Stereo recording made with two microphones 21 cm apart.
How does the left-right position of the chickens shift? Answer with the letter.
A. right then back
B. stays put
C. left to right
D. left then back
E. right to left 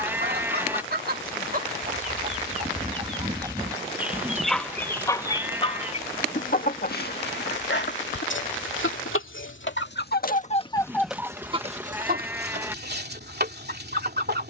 D.